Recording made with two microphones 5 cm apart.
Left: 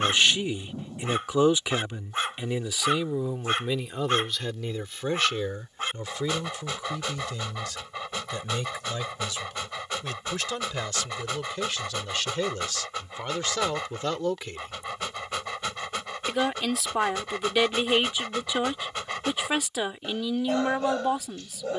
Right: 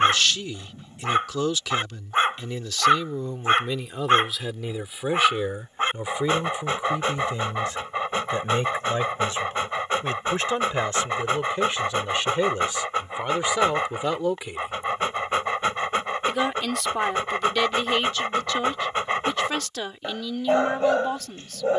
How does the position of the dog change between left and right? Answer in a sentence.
You can hear the dog stay in one place.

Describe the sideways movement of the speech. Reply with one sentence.
You can hear the speech go right and come back.